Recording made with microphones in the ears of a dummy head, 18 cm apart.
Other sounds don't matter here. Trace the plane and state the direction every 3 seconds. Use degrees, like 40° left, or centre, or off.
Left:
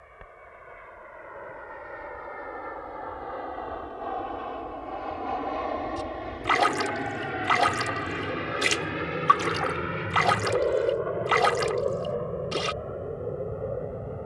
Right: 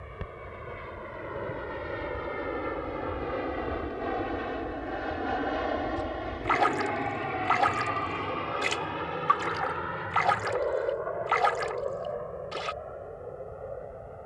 50° right, 20° right, 10° left, 30° left, 50° left.